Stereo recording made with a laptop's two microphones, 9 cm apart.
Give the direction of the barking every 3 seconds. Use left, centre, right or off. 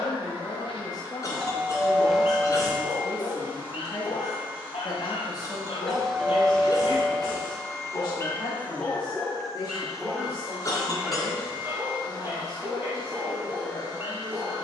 left, left, left, centre, right.